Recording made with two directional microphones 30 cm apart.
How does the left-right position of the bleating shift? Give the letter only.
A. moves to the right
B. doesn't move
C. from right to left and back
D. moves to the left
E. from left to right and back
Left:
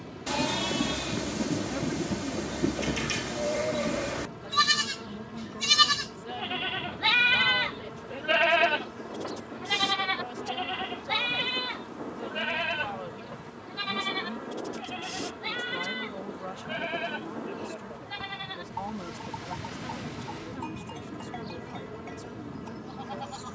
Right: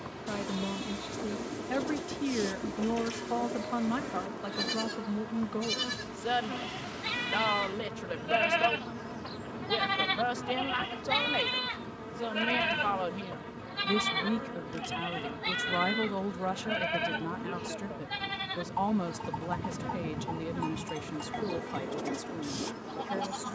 A.